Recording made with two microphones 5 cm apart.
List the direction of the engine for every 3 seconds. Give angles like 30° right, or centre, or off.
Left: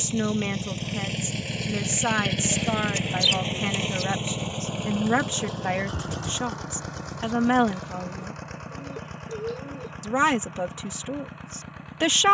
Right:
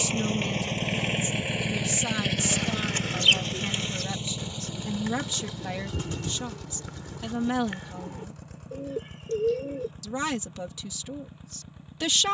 20° right, 40° left, 60° left, 70° left.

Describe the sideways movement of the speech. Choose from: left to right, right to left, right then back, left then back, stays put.
stays put.